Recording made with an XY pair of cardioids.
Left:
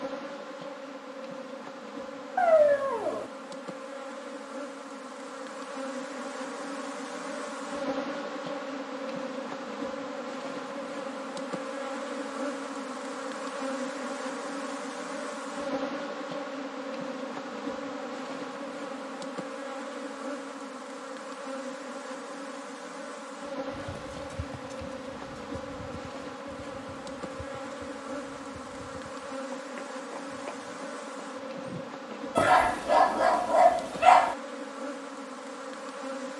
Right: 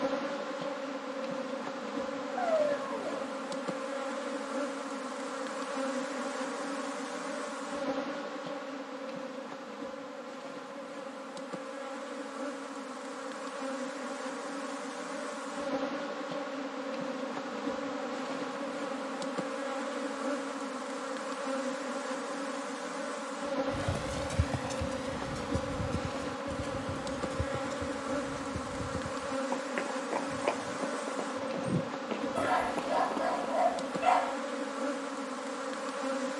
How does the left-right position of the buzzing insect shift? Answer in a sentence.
You can hear the buzzing insect go left and come back.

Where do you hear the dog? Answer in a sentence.
In this clip you hear the dog on the left.